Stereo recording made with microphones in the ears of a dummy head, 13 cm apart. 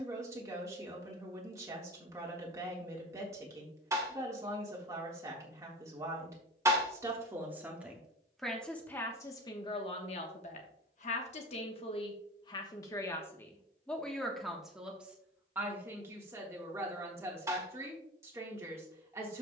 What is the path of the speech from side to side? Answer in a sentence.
In this clip you hear the speech go left and come back.